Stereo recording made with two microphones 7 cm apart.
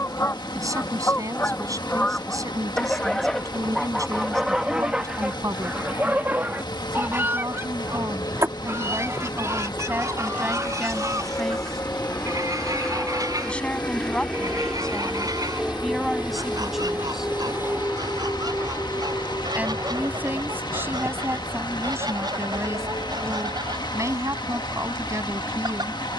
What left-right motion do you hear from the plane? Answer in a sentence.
In this clip you hear the plane move to the right.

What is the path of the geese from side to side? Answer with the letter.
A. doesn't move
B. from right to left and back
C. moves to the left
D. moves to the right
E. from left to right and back
D.